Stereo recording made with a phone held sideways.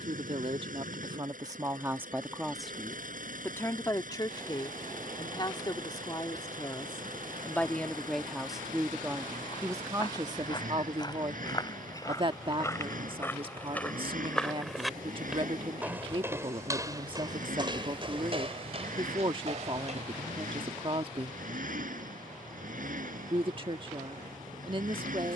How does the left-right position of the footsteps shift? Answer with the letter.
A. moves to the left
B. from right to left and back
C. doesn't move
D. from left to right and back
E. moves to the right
E.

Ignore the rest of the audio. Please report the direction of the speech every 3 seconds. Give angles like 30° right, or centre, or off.
20° right, 30° left, 10° left, 30° right, 40° right, 40° right, 40° right, 40° right, 40° right.